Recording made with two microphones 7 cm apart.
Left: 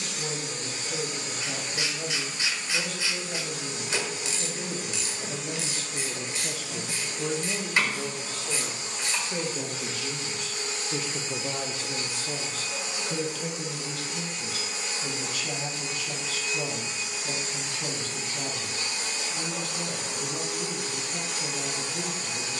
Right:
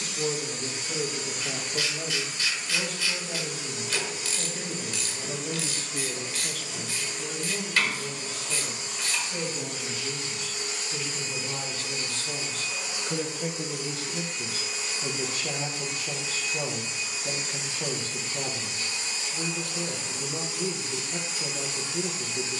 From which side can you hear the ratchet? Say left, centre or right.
left.